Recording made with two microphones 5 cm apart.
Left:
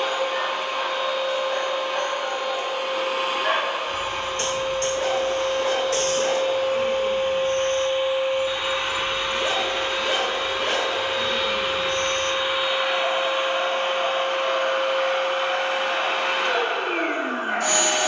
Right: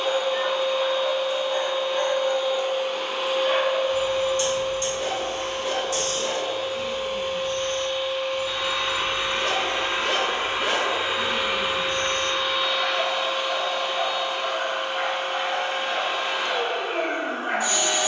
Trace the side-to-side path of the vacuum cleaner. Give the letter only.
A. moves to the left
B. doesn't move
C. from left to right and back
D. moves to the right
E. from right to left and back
C.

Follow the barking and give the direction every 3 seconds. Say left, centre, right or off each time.
left, left, left, centre, right, right.